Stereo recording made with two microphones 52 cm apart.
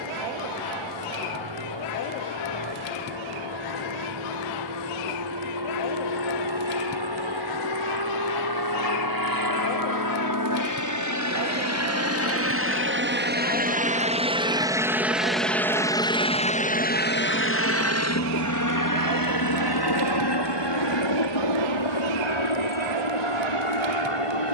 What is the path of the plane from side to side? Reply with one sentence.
In this clip you hear the plane move to the left.